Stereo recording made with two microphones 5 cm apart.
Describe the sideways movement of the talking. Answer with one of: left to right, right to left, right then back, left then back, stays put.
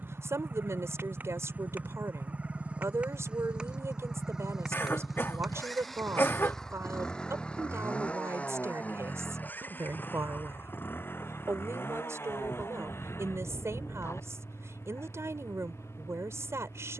stays put.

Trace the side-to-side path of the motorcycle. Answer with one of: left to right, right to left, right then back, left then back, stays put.
right to left.